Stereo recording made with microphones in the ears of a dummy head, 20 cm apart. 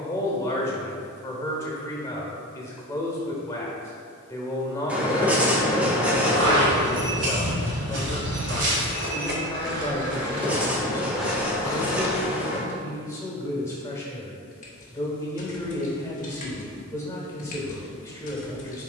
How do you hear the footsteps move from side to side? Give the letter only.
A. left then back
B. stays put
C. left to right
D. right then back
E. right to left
E.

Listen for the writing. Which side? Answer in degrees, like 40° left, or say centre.
10° right.